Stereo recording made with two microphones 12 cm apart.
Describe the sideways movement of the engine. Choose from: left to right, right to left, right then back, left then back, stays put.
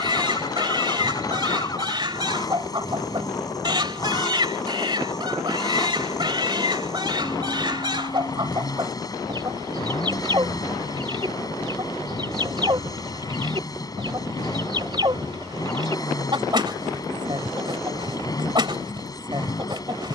stays put.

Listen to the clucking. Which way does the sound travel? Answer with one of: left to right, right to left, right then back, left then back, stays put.
stays put.